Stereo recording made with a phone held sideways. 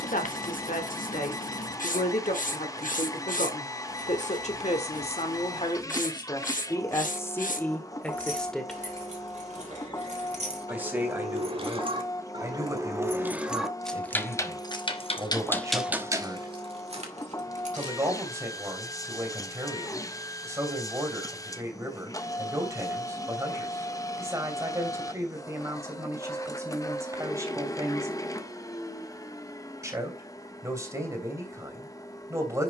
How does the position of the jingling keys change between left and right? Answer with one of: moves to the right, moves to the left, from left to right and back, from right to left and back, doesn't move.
from right to left and back.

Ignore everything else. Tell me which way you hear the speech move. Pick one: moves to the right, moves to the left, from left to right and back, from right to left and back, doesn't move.
moves to the right.